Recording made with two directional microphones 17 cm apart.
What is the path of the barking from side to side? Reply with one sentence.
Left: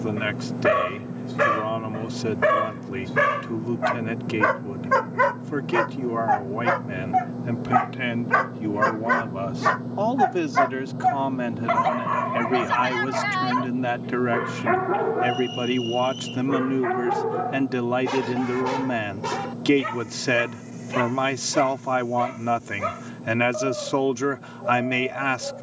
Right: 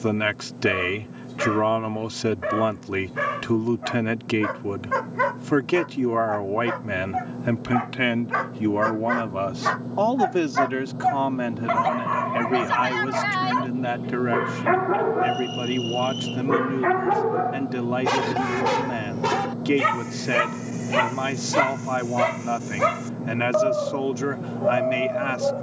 You can hear the barking go from the left side to the right.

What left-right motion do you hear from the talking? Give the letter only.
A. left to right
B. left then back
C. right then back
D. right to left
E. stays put
D.